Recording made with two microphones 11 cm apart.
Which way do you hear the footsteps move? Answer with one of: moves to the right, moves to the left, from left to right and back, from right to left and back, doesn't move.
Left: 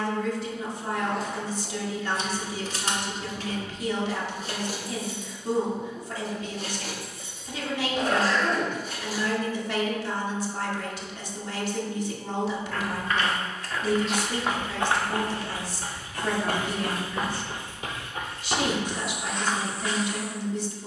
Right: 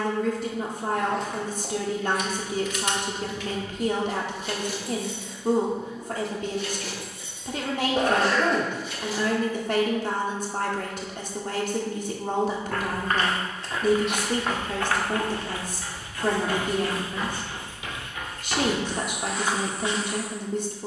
from right to left and back.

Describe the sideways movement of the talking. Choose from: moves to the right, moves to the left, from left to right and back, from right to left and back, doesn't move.
doesn't move.